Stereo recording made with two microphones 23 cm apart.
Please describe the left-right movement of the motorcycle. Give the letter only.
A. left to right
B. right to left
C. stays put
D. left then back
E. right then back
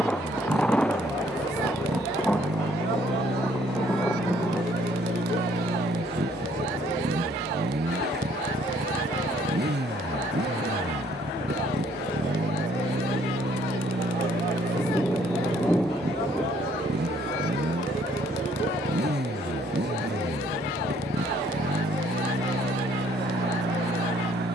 C.